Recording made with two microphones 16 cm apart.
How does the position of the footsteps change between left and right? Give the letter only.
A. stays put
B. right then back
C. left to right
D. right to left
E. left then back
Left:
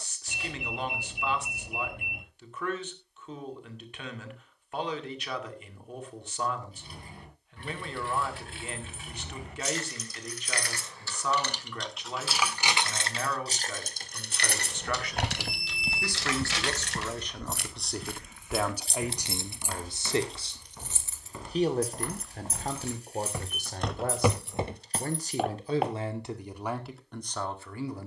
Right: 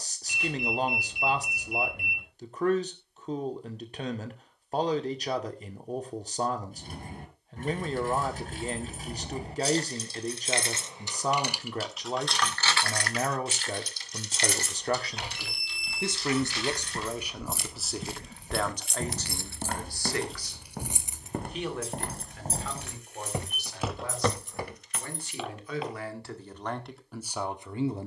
B.